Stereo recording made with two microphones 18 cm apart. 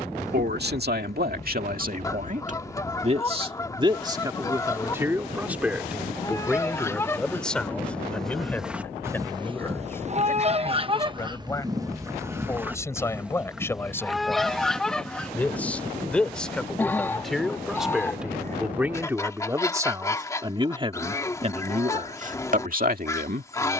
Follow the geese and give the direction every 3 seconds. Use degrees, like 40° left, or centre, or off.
20° left, 20° left, 10° left, 30° right, 10° right, 10° left, 20° left, 20° left.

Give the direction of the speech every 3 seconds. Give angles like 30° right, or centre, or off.
60° right, 20° right, centre, 10° left, 10° left, centre, 20° right, 50° right.